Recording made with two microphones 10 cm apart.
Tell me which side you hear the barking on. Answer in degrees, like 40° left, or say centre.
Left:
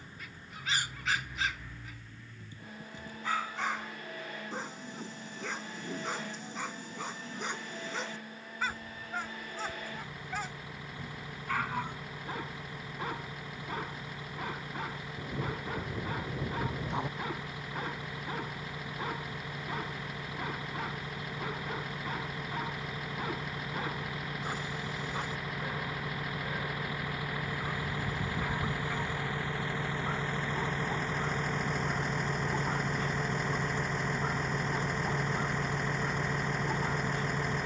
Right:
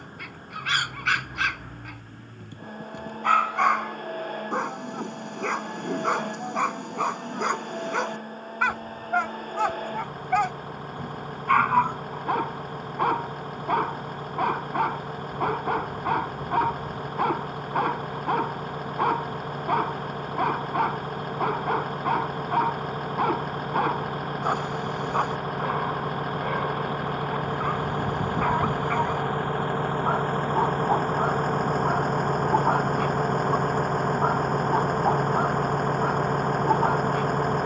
60° right.